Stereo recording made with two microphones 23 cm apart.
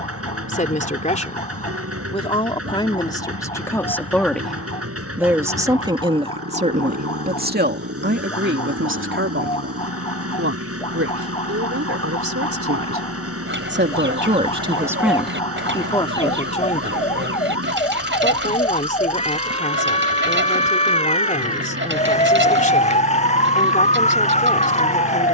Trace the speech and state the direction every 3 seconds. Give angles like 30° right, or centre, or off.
30° left, centre, 40° right, 70° right, 50° right, 20° left, 30° left, 30° left, 30° left.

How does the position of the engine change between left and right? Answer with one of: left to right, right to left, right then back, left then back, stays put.
stays put.